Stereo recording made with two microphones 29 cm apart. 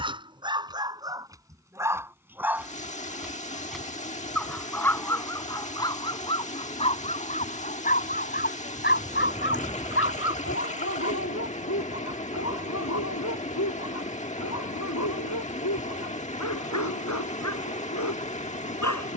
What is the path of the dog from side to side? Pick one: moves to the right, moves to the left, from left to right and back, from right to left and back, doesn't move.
moves to the left.